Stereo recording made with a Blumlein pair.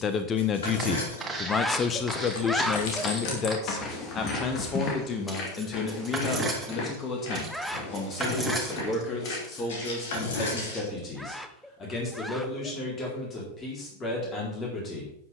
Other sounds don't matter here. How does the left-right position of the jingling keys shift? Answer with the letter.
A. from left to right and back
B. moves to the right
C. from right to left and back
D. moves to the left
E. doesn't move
A.